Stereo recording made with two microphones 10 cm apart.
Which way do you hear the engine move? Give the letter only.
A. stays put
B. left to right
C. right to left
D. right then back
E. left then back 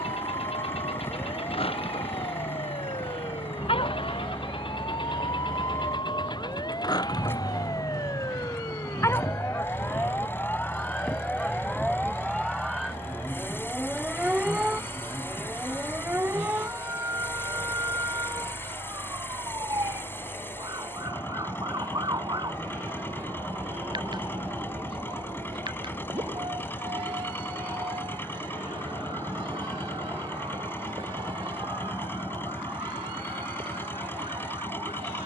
A.